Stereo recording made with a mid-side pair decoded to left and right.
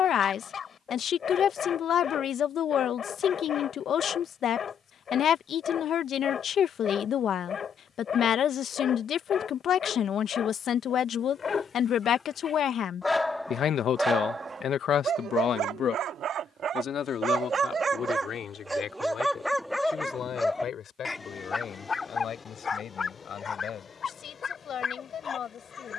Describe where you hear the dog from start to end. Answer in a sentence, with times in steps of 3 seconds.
In this clip you hear the dog on the left from 0 s, in the centre from 12 s, on the right from 15 s, in the centre from 18 s and on the left from 21 s.